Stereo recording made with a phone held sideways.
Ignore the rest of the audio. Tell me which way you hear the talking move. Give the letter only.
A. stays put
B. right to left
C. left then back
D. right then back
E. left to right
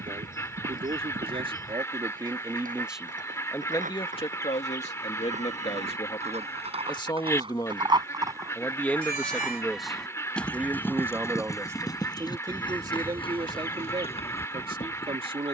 C.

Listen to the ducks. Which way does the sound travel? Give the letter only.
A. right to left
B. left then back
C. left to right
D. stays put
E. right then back
D.